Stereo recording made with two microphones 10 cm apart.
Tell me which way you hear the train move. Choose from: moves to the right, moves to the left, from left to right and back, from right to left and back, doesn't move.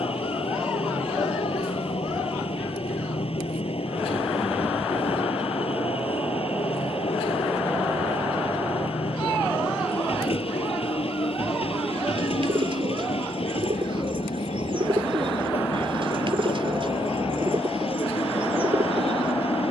doesn't move.